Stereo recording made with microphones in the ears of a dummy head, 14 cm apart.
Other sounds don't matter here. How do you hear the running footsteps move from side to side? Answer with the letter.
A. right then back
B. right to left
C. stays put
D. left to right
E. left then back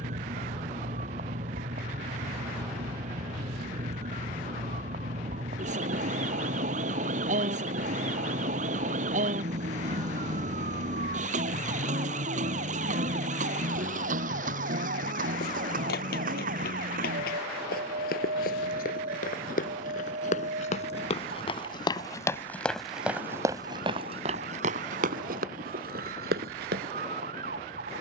D.